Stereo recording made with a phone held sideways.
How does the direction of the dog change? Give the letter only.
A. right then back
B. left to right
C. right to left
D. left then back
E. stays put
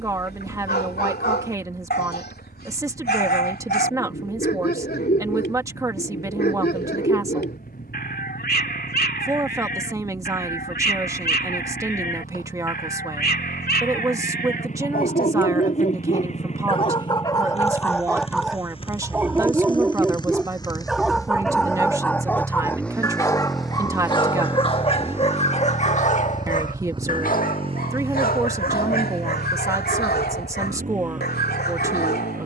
A.